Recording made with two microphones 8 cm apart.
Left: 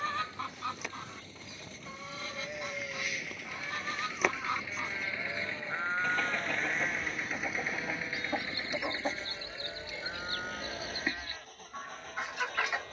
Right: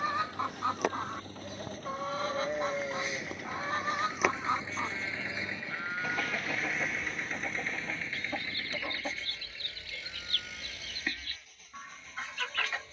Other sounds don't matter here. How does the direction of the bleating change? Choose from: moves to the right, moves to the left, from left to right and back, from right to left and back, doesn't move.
moves to the left.